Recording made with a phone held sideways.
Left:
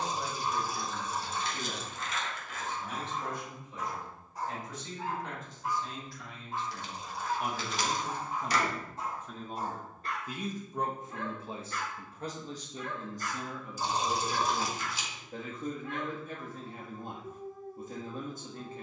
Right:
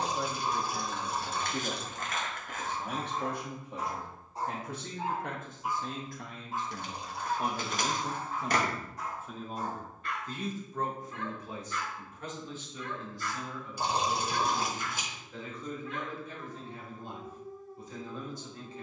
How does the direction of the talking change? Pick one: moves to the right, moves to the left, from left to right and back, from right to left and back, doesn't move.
moves to the left.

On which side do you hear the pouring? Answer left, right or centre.
right.